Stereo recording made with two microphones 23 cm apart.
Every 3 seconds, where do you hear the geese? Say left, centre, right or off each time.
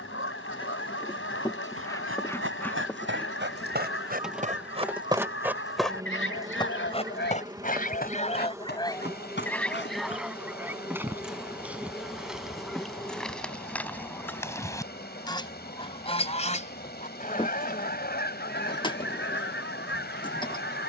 left, left, left, centre, centre, left, left.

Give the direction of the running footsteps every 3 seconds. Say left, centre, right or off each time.
right, right, left, left, off, off, off.